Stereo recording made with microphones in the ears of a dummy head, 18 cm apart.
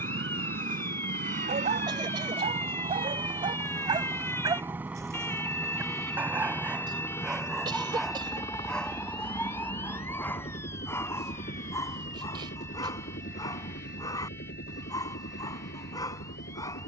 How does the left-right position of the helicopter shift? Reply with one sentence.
You can hear the helicopter move from right to left.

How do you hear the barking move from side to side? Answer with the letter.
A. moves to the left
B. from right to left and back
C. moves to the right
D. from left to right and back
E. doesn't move
A.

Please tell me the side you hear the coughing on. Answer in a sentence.
In this clip you hear the coughing on the right.